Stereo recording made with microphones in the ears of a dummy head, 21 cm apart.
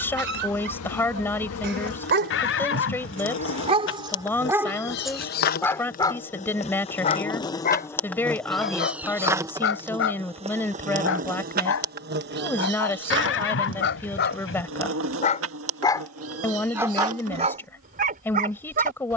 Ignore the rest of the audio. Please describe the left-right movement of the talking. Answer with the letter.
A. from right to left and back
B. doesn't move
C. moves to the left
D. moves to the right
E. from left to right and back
B.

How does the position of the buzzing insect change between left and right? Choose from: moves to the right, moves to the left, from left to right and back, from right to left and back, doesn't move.
moves to the right.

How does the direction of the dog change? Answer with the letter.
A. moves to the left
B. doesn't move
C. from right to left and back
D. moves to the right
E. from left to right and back
C.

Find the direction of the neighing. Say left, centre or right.
left.